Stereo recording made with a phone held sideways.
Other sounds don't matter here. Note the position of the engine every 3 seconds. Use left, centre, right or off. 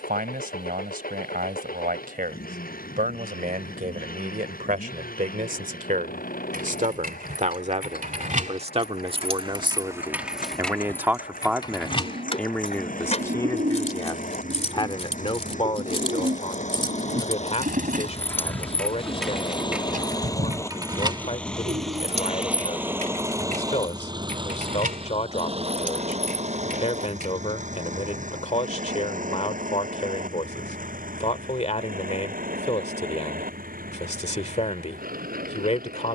left, left, left, left, left, left, left, centre, right, right, right, right.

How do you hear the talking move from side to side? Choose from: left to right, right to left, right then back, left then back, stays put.
right to left.